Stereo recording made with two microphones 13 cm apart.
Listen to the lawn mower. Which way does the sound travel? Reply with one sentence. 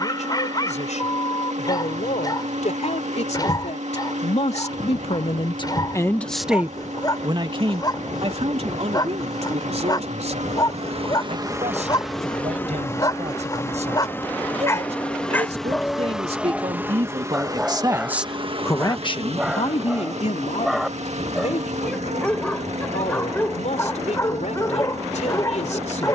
In this clip you hear the lawn mower go left and come back.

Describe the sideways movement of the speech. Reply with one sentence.
In this clip you hear the speech move from left to right and back again.